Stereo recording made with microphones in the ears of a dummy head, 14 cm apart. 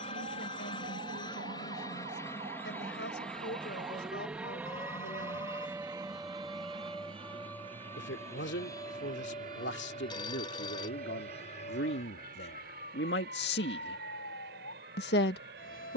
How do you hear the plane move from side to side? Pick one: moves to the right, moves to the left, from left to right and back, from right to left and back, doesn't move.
moves to the right.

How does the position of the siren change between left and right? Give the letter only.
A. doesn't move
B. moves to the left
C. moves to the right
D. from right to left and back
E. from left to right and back
B.